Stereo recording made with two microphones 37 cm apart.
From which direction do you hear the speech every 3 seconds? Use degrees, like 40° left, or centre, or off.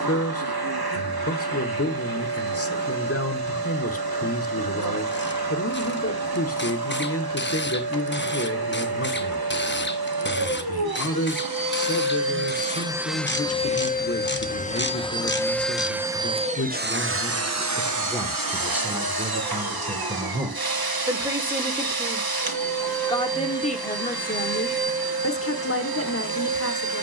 40° left, 40° left, 40° left, 40° left, 40° left, 30° left, 10° right, 10° left, 30° left.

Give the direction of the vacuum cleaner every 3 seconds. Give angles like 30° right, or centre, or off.
80° right, 80° right, 80° right, 70° right, centre, 20° right, 70° right, 70° right, 70° right.